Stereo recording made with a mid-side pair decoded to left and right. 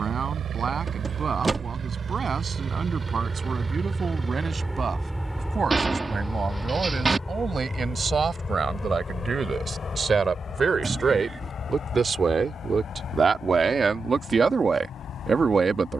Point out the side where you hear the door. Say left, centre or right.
right.